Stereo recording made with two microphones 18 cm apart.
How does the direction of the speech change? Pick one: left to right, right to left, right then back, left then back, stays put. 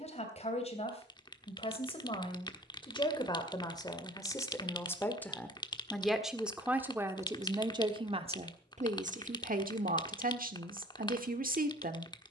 left to right.